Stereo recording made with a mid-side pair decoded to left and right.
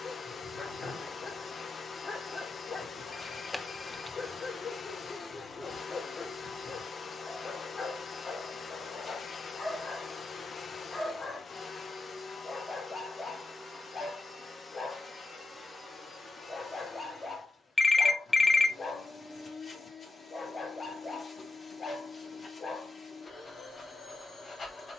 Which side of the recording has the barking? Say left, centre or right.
left.